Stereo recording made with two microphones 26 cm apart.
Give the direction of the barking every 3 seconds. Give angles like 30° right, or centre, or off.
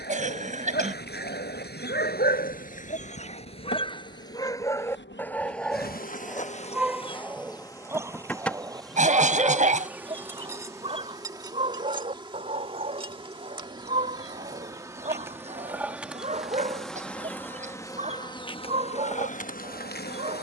40° left, 10° left, 10° right, 20° right, 30° right, 30° right, 30° right.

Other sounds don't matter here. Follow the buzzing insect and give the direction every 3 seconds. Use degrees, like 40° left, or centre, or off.
50° left, 50° left, 20° left, 10° right, 20° right, centre, 30° left.